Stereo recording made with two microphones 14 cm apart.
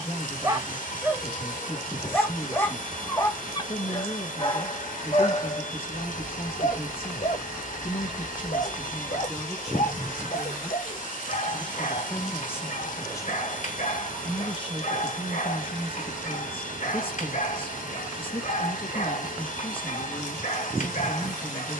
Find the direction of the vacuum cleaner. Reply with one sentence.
In this clip you hear the vacuum cleaner on the left.